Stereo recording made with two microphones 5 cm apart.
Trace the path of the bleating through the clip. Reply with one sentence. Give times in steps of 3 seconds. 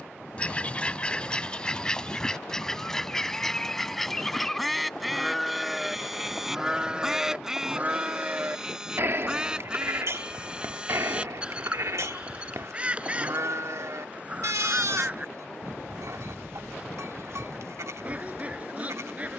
You can hear the bleating on the left from 0 s, in the centre from 3 s and on the right from 6 s.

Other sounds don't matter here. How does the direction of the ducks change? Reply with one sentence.
In this clip you hear the ducks travel towards the right.